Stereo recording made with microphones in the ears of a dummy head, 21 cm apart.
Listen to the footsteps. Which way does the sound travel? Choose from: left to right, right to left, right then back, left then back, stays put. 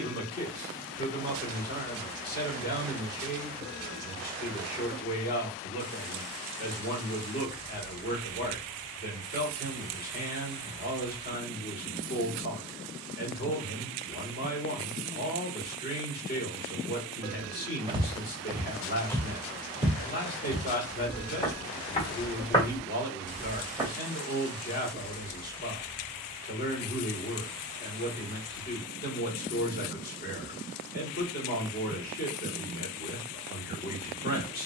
left then back.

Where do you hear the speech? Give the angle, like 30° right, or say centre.
40° left.